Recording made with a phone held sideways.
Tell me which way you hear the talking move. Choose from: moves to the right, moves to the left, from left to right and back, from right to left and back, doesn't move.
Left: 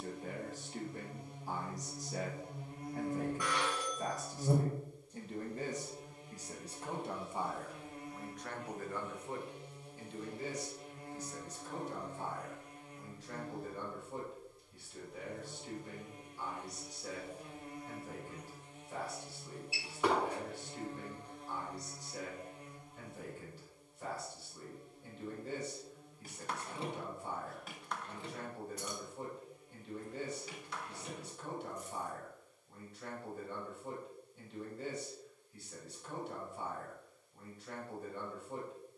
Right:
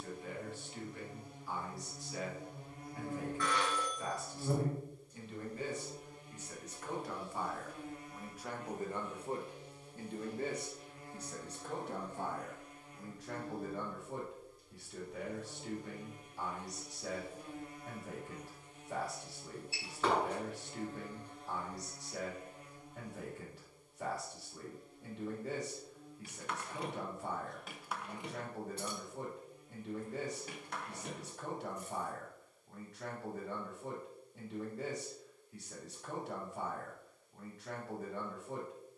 moves to the right.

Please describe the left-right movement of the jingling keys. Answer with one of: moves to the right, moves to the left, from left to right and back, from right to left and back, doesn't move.
moves to the right.